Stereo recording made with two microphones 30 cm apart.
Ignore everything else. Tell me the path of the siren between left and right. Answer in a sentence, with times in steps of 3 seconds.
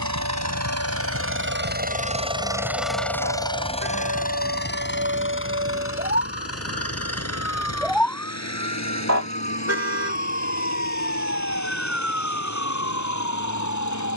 You can hear the siren on the right from 0 s, in the centre from 6 s and on the left from 9 s.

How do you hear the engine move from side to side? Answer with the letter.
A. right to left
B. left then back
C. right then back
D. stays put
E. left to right
A.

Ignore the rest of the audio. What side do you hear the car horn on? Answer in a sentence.
In this clip you hear the car horn on the right.